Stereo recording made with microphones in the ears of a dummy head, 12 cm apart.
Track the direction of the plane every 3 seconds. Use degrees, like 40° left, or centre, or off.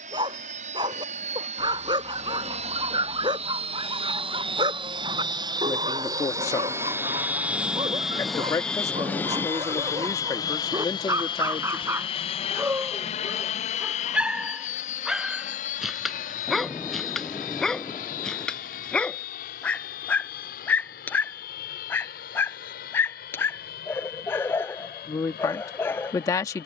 60° right, 40° right, 10° right, 30° left, 50° left, 60° left, 70° left, 70° left, 70° left.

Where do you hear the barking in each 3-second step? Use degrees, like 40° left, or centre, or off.
30° right, 30° right, 30° right, 20° right, 10° right, centre, 10° left, 10° left, 20° left.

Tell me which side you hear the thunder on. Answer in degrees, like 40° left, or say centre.
20° left.